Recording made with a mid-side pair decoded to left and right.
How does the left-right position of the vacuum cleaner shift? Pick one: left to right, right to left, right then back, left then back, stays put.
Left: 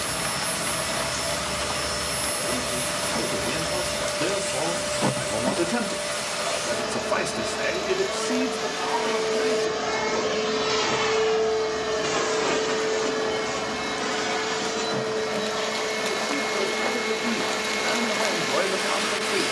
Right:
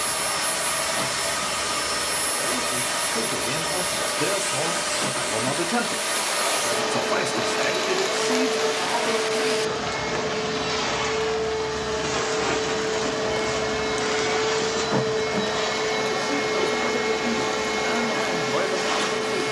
left then back.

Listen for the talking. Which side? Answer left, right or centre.
centre.